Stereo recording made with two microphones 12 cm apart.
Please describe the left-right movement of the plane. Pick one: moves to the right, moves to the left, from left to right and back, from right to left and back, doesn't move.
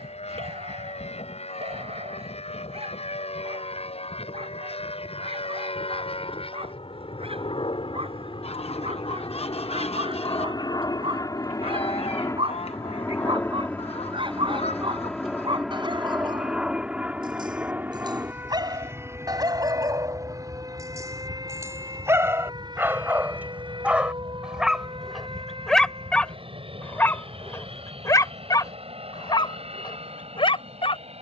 moves to the right.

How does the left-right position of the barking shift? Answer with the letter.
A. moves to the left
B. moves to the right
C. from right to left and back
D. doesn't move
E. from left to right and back
A.